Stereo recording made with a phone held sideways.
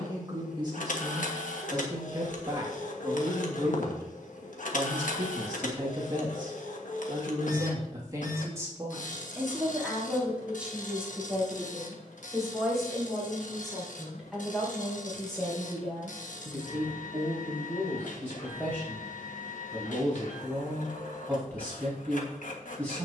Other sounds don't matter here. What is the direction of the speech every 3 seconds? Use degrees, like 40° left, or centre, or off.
30° right, 30° right, 30° right, 10° right, centre, 10° left, 10° left, 10° left.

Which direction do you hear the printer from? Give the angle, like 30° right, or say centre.
70° left.